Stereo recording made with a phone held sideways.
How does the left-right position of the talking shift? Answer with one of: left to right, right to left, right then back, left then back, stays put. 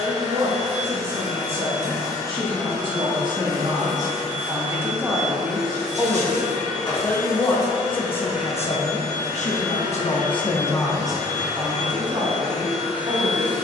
left then back.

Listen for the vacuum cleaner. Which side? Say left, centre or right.
left.